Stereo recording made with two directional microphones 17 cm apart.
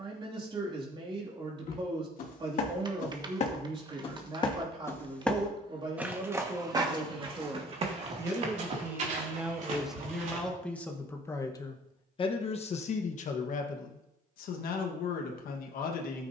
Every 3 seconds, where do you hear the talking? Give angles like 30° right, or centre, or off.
30° right, 30° right, 20° right, centre, 50° left, 70° left.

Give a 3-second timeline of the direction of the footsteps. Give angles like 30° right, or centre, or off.
60° left, 30° left, 30° right, 50° right, off, off.